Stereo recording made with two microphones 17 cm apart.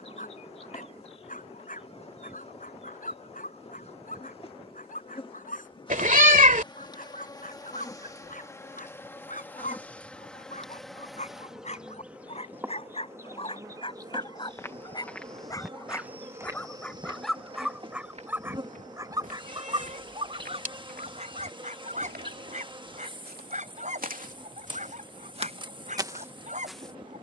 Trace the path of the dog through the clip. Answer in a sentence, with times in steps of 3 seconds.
You can hear the dog on the left from 0 s, in the centre from 15 s and on the right from 18 s.